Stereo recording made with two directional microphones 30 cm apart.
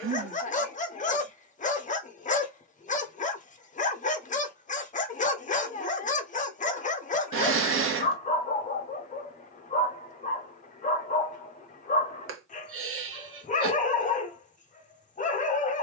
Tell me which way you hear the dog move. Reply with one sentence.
You can hear the dog stay in one place.